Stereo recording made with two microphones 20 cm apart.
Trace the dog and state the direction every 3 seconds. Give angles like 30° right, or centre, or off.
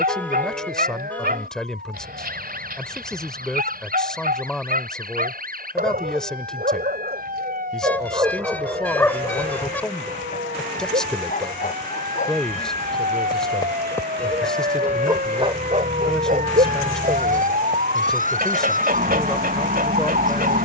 50° right, 50° right, 40° right, 40° left, 20° left, 40° right, 50° right.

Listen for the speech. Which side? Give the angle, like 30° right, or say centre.
centre.